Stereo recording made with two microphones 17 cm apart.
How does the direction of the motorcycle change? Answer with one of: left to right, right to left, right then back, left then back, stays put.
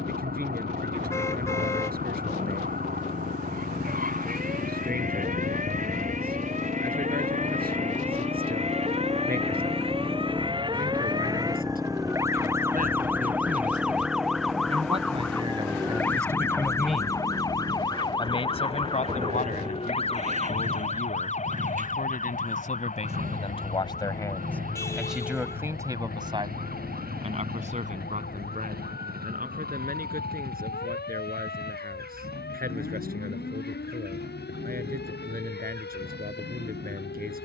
left to right.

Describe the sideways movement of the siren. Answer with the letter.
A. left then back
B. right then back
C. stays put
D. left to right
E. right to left
E.